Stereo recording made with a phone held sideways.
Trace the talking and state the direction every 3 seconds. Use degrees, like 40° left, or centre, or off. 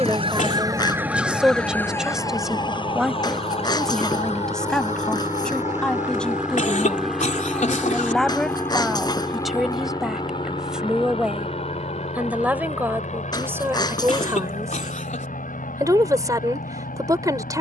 10° right, centre, centre, centre, 20° right, 20° right.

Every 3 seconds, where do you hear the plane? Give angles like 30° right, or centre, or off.
40° right, 30° right, centre, 30° left, 50° left, 60° left.